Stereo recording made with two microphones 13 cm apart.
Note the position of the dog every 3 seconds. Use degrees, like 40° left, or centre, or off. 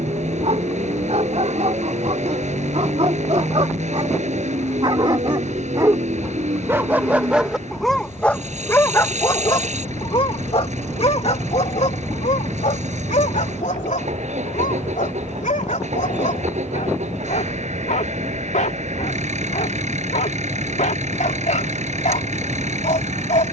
60° right, 40° right, centre, 50° left, 70° left, 70° left, 70° left, 70° left.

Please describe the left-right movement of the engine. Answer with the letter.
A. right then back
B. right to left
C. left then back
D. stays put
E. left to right
D.